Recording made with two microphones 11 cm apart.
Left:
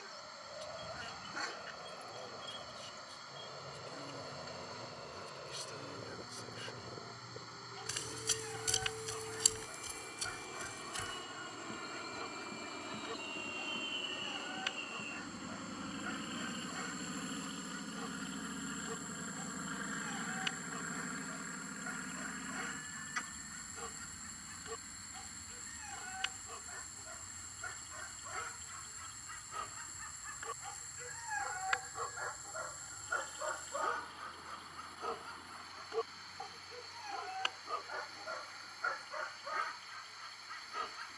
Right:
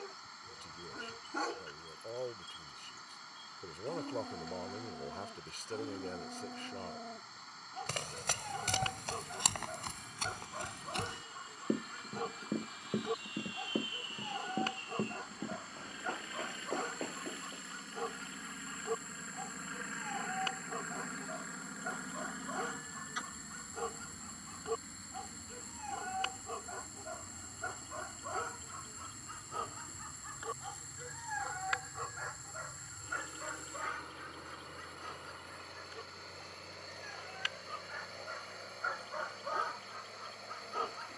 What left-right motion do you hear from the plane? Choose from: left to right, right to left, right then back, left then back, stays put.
left to right.